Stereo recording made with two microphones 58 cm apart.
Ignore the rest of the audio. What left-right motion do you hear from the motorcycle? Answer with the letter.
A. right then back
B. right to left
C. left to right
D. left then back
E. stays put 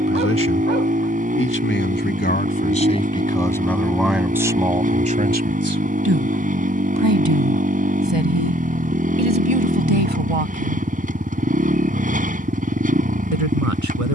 E.